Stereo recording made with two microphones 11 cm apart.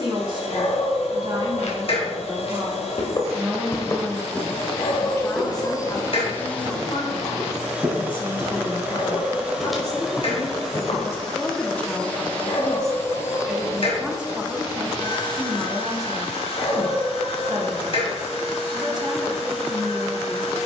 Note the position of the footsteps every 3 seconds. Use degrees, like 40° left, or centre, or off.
60° left, 10° left, 30° right, 20° left, off, off, off.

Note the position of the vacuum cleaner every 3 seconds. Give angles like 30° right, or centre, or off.
60° left, 50° left, centre, centre, 30° left, 50° left, 60° left.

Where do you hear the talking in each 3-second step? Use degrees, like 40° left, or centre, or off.
40° right, 10° left, 40° left, 20° left, centre, 30° right, 40° right.